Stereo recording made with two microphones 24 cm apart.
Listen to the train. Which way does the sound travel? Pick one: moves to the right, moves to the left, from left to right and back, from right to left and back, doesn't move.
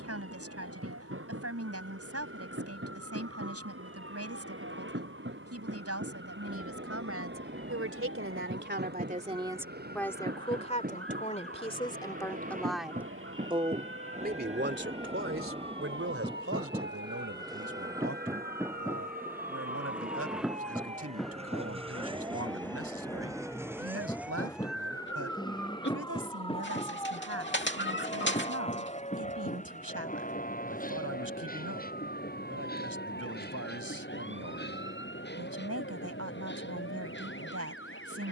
moves to the left.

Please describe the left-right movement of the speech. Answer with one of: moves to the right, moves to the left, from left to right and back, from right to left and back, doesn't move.
from right to left and back.